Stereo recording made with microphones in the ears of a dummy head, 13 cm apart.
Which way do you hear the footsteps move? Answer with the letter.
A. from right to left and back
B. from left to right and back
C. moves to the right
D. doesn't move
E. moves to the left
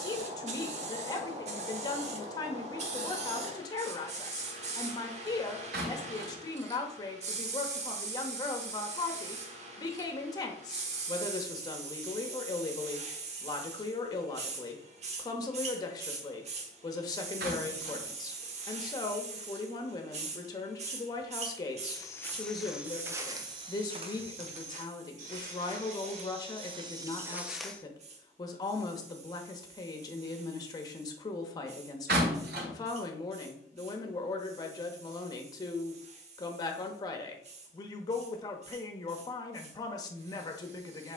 B.